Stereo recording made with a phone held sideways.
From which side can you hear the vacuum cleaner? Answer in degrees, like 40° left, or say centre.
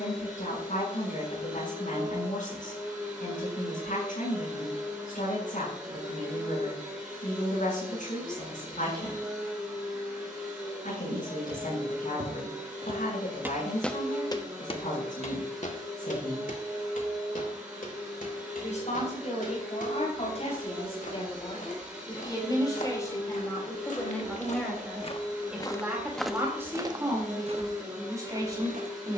10° right.